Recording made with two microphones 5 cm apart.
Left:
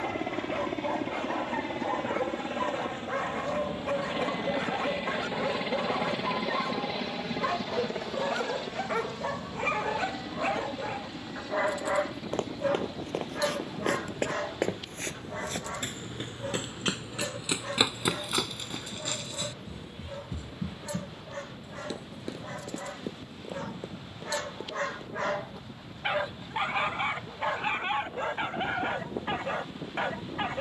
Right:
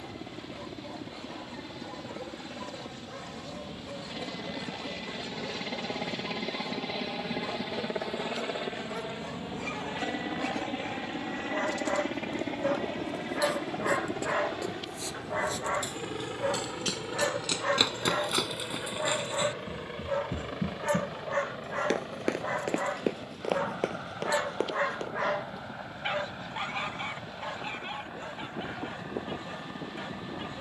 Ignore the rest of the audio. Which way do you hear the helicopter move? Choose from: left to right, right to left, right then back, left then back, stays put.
left to right.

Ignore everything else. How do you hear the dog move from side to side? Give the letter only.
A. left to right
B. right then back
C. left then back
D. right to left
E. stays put
B.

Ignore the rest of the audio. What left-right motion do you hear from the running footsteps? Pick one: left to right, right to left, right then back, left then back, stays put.
left to right.